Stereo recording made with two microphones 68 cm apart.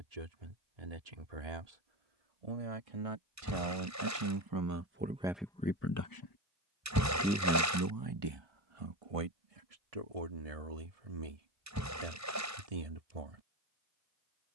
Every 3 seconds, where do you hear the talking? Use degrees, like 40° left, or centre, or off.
60° right, 20° right, 20° right, 60° right, 60° right.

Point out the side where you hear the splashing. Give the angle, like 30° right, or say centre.
20° right.